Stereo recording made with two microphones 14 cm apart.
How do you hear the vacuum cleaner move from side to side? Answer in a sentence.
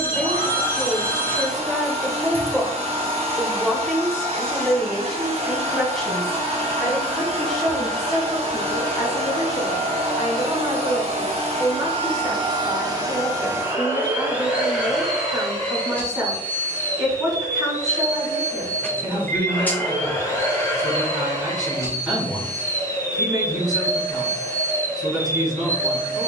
You can hear the vacuum cleaner move from right to left.